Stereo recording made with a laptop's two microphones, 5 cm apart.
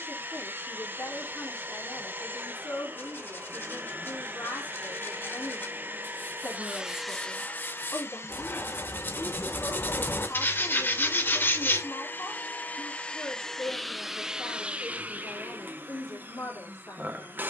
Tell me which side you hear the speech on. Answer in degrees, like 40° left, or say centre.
70° left.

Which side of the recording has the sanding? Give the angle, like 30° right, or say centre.
40° left.